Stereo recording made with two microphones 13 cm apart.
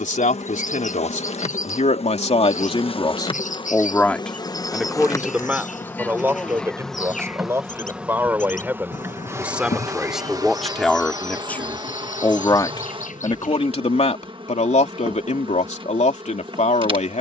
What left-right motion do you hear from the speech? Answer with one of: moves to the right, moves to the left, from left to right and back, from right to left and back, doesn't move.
from left to right and back.